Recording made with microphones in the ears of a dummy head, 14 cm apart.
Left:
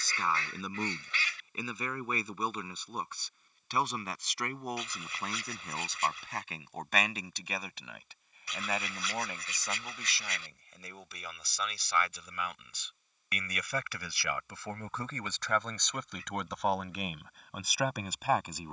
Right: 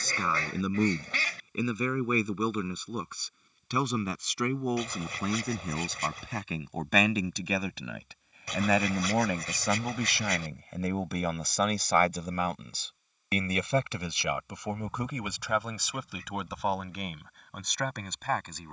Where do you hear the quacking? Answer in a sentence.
You can hear the quacking on the right.